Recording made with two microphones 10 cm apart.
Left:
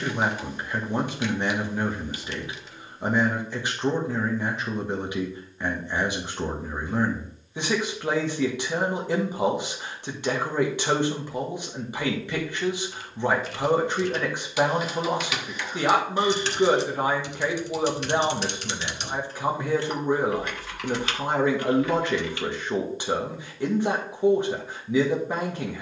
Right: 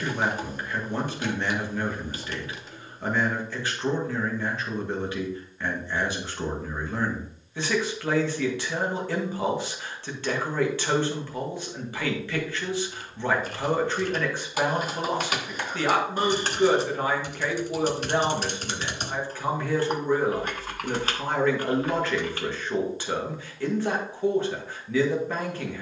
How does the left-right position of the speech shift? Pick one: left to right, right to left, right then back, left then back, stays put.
stays put.